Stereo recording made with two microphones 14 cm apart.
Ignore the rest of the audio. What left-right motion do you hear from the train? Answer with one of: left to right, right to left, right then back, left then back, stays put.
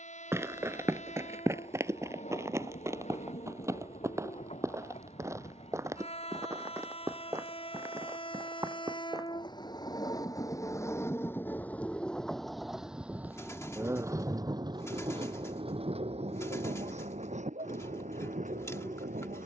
left to right.